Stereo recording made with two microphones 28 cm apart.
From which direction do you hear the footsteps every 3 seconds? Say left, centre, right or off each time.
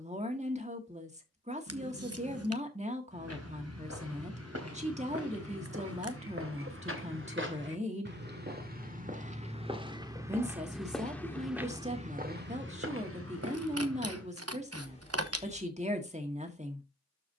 off, right, right, centre, right, off.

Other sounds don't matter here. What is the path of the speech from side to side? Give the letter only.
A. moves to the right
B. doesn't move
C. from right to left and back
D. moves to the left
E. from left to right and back
B.